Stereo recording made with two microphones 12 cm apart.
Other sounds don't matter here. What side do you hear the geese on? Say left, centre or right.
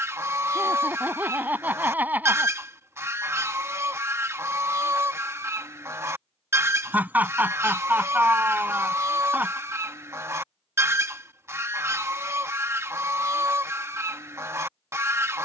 right.